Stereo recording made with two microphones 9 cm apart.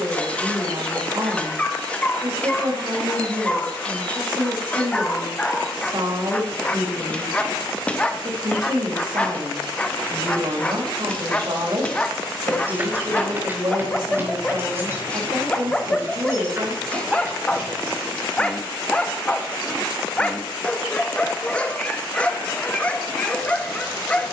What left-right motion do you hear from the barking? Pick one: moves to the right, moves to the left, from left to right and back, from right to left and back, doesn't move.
doesn't move.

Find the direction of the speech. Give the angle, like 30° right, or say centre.
60° right.